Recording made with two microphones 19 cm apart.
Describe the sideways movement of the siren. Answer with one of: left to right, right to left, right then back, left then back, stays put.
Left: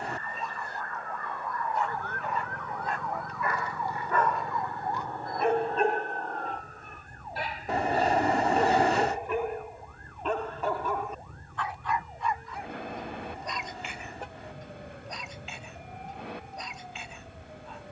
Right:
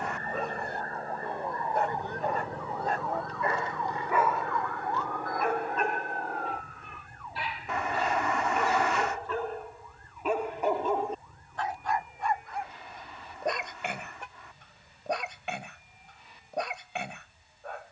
right to left.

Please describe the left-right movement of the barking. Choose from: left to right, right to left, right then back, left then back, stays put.
left then back.